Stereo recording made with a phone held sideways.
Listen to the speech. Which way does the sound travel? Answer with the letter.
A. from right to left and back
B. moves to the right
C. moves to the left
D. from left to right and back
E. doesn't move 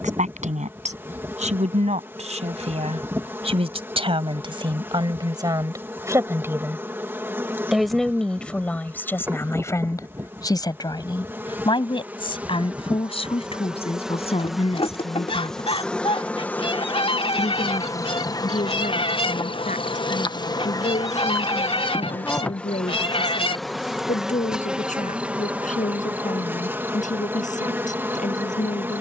C.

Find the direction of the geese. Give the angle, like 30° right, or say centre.
40° left.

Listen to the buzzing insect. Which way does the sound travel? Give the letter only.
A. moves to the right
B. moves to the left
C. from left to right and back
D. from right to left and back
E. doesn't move
D.